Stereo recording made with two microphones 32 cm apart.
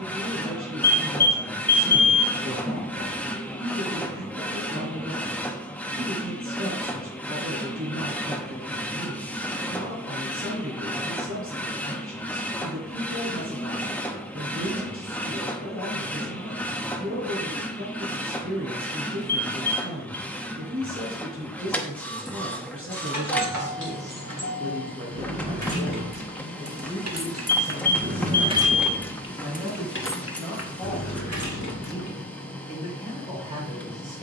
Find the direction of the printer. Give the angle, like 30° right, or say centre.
10° left.